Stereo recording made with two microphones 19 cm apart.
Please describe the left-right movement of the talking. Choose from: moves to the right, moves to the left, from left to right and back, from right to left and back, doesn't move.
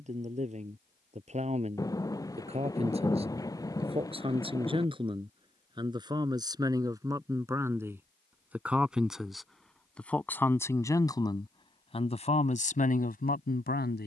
moves to the left.